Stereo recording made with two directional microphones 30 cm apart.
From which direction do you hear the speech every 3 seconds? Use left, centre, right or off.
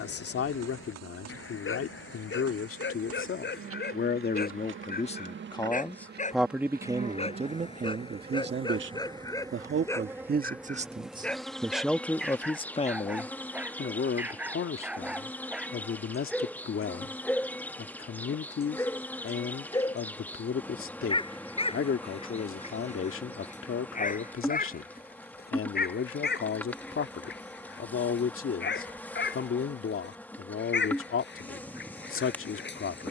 left, left, right, right, left, left, left, left, left, left, left.